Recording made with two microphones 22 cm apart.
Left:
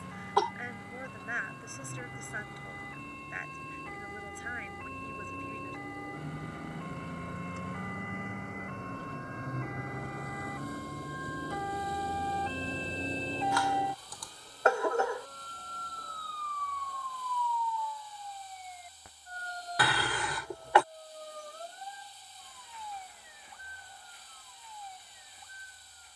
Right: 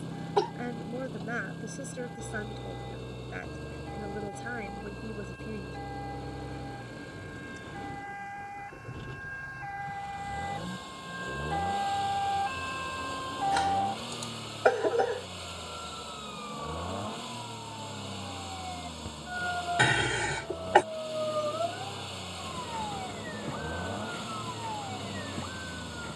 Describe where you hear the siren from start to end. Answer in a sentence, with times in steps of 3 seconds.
In this clip you hear the siren on the left from 0 s and on the right from 15 s.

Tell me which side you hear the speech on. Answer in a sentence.
You can hear the speech on the right.